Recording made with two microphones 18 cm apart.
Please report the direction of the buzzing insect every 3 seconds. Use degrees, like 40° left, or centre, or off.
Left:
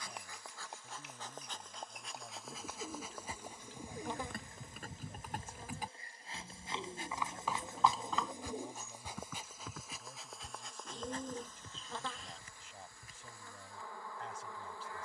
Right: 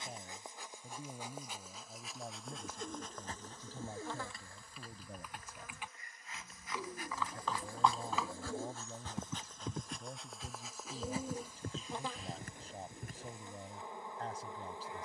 10° right, 20° left, 20° left, centre, 20° right.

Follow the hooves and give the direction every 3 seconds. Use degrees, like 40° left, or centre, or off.
70° left, 50° left, 10° left, 40° right, 60° right.